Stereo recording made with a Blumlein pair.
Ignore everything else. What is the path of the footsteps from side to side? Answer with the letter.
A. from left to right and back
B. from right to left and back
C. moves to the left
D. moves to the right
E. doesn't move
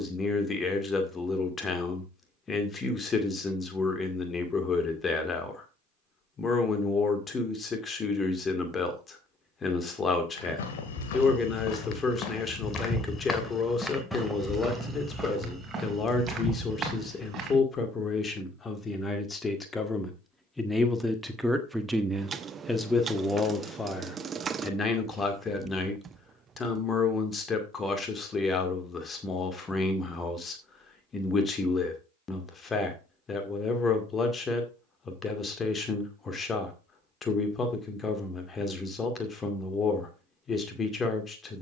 D.